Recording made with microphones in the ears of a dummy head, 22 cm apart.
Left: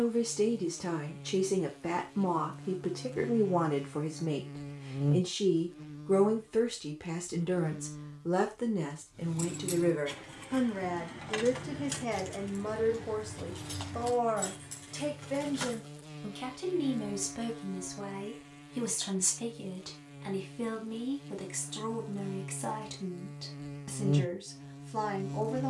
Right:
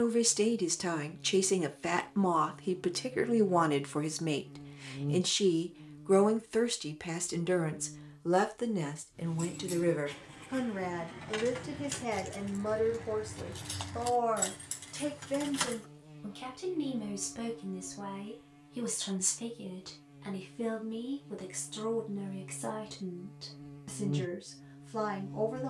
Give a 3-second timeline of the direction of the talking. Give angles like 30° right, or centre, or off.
80° right, 60° right, 30° right, 20° right, centre, centre, 10° left, 10° left, 10° left.